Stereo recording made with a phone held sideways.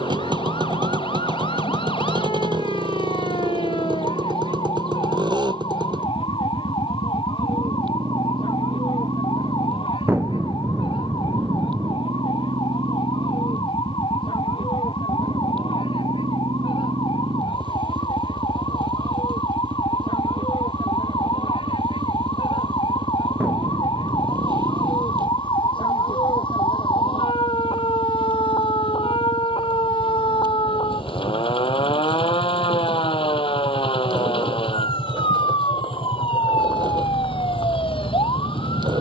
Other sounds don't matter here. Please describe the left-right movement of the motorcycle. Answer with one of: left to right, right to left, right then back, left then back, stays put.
stays put.